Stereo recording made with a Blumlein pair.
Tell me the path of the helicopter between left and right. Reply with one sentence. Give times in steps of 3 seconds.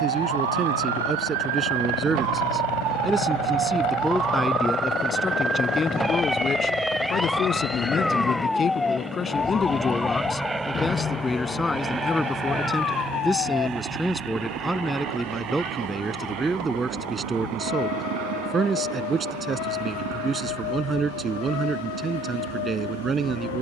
You can hear the helicopter on the left from 0 s, in the centre from 6 s and on the right from 12 s.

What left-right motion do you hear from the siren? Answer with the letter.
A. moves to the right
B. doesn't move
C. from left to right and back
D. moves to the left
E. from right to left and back
D.